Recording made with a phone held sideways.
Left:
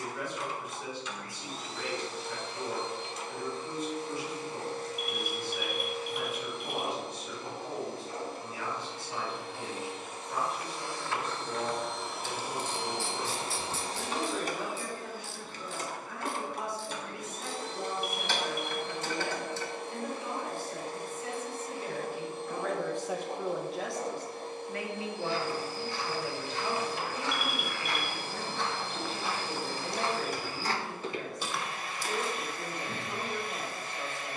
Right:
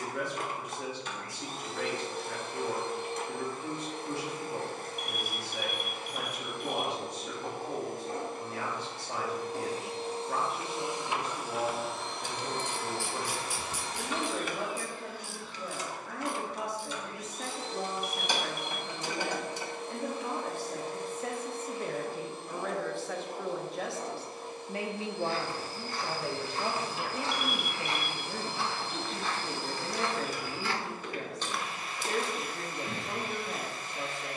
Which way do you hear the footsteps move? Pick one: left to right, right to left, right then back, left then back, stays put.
left then back.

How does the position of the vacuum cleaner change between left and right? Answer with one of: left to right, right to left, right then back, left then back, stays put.
right to left.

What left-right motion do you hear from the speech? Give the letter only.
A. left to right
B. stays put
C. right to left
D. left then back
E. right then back
D.